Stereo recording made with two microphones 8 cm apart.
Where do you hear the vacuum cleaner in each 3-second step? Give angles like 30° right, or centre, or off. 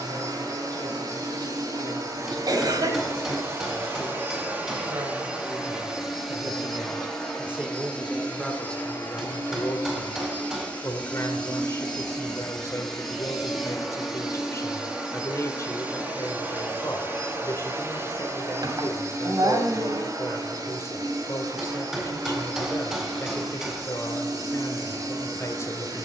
50° right, 20° right, 10° left, 20° left, centre, 20° right, 40° right, 50° right, 50° right.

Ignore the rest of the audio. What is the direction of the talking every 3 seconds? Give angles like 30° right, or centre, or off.
60° right, 50° right, 10° right, 30° left, 40° left, 40° left, 40° left, 40° left, 40° left.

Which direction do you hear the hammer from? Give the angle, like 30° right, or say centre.
10° right.